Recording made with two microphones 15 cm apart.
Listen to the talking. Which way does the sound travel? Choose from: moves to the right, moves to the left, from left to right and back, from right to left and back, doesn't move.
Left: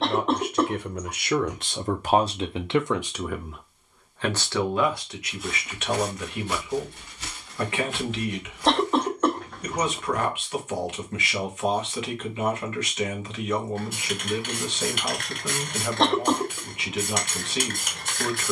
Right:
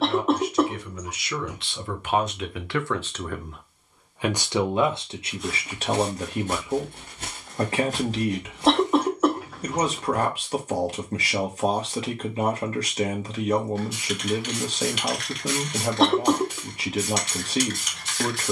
moves to the right.